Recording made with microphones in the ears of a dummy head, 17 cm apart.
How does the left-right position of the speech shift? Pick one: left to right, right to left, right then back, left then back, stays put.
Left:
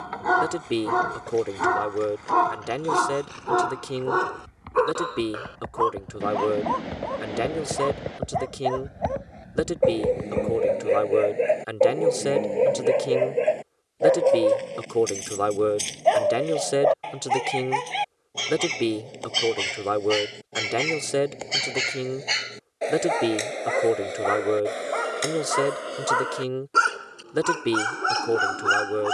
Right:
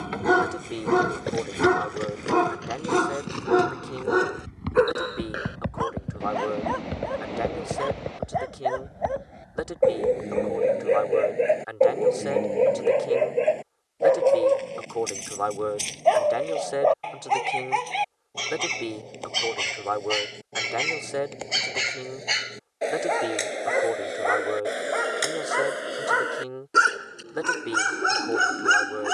stays put.